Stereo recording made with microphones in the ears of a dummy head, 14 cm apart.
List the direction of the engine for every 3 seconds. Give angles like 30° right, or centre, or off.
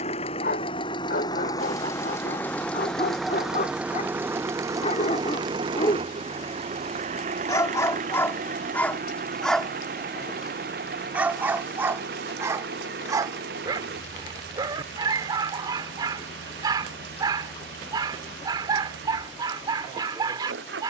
20° left, 20° right, 50° right, 60° right, 70° right, 70° right, 70° right.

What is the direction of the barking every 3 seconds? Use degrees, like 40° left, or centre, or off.
60° left, 50° left, 20° left, 10° right, 20° right, 30° right, 30° right.